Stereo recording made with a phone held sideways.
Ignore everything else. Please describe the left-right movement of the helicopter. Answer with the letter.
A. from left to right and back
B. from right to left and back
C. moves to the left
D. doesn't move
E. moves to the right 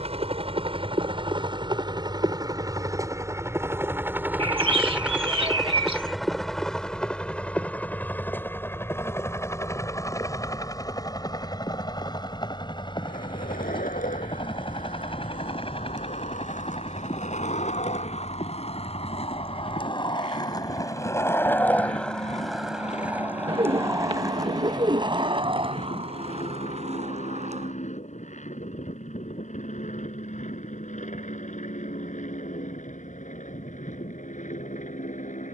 C.